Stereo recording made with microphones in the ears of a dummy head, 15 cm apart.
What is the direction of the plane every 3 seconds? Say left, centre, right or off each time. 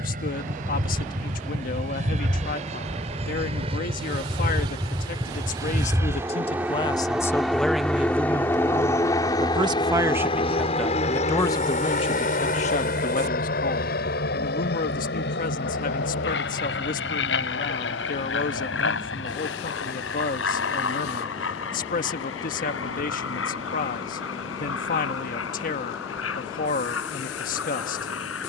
right, right, centre, left, left, left, left, left, left, left.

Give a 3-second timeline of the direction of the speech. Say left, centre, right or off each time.
left, left, centre, centre, left, left, left, left, left, left.